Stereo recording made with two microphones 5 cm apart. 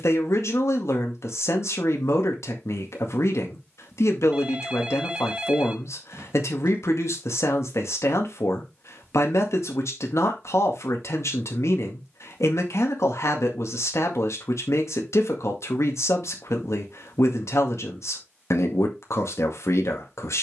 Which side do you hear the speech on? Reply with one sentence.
In this clip you hear the speech on the left.